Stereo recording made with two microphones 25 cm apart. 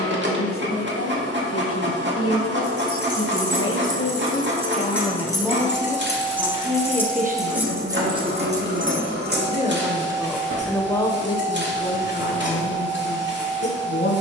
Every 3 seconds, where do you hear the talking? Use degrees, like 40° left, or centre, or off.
60° left, 30° left, 30° right, centre, 50° left.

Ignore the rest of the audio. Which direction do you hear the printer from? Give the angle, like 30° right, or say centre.
50° right.